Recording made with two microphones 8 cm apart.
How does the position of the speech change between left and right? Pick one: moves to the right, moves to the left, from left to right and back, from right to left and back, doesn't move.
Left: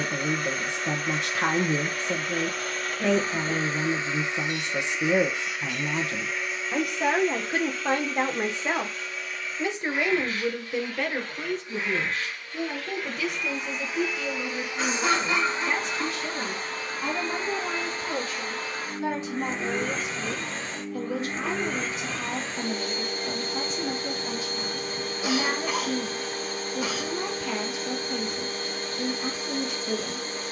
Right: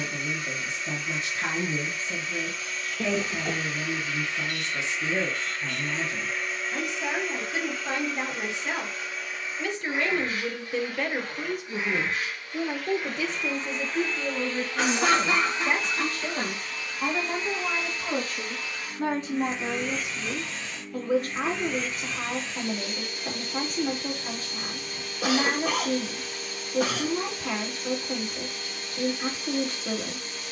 moves to the right.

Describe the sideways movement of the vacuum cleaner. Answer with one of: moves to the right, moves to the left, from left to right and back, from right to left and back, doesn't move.
from left to right and back.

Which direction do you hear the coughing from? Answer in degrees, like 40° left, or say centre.
80° right.